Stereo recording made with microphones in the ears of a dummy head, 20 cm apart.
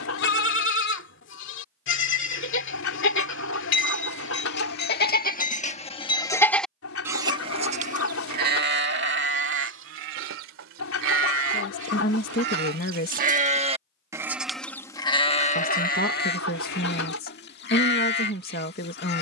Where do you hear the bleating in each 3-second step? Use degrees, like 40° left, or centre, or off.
60° left, 50° left, 20° right, 60° right, 30° right, 50° left, 50° left.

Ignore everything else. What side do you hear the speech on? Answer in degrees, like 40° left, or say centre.
50° left.